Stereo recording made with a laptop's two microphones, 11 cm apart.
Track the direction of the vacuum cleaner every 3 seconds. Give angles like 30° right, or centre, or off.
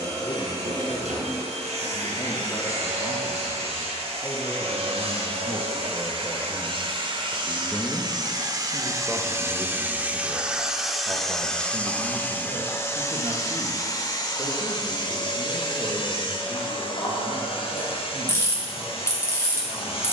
70° right, 60° right, 40° right, 10° right, 30° left, 50° left, 60° left.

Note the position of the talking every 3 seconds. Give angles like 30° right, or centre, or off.
50° left, 30° left, 10° left, 20° right, 50° right, 60° right, 70° right.